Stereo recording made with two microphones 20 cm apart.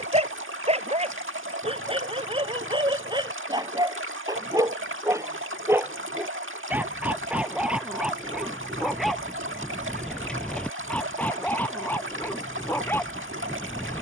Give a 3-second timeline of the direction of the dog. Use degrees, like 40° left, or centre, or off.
30° right, 20° right, centre, centre, 10° left.